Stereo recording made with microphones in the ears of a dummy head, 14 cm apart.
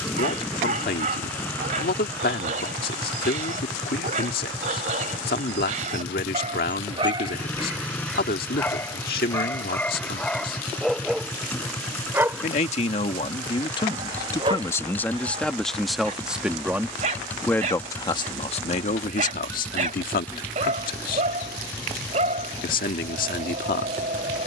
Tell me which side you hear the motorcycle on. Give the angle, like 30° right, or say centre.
10° left.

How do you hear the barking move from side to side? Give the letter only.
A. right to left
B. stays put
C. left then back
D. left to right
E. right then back
C.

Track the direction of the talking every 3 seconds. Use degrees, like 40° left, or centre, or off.
70° left, 70° left, 70° left, 70° left, 30° left, centre, 60° left, 70° left.